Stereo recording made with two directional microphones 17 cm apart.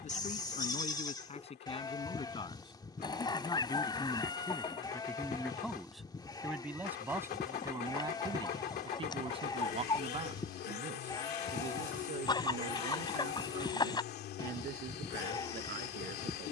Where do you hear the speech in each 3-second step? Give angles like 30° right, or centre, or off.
40° left, 10° left, 20° right, 40° right, 60° right, 60° right.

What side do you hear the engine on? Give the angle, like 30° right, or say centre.
70° left.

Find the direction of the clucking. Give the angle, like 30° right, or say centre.
20° left.